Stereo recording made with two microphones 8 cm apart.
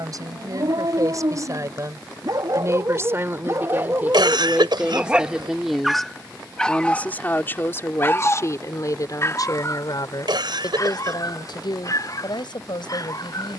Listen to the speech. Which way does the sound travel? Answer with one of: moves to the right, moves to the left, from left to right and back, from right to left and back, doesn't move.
moves to the left.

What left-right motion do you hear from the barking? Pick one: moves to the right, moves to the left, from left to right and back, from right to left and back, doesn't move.
moves to the left.